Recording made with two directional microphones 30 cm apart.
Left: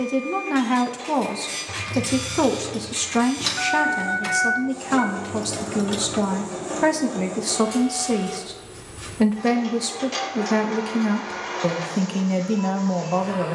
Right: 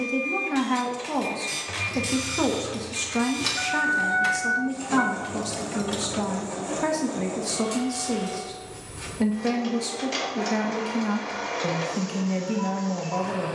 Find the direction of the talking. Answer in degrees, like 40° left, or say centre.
30° left.